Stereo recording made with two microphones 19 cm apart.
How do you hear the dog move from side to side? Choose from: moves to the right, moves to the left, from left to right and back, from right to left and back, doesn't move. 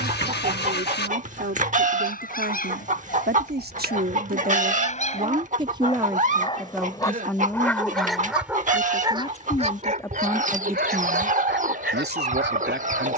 moves to the right.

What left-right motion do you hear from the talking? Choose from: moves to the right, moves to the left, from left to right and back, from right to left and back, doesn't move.
from right to left and back.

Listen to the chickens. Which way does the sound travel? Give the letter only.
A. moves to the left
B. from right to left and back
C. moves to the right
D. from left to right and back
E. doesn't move
E.